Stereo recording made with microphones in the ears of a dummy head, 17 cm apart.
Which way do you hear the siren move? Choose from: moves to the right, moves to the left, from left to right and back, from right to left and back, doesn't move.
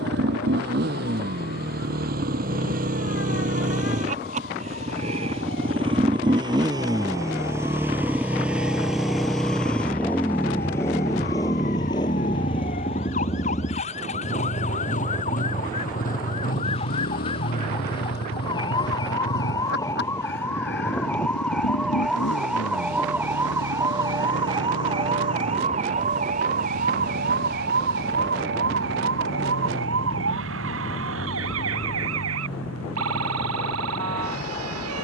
moves to the right.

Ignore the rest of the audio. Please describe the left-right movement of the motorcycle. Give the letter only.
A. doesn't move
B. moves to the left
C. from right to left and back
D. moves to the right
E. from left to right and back
B.